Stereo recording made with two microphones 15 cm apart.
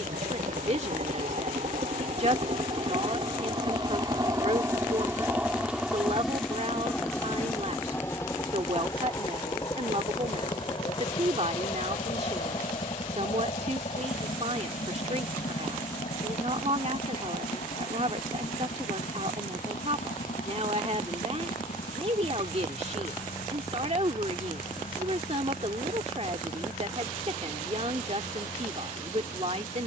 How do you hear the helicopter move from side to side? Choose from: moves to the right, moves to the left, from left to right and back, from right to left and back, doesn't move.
moves to the left.